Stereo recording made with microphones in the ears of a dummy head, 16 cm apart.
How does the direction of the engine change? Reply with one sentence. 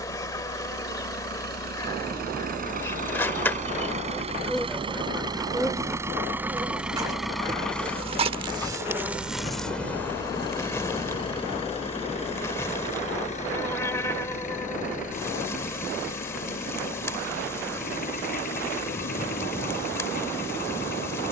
You can hear the engine go from the right side to the left.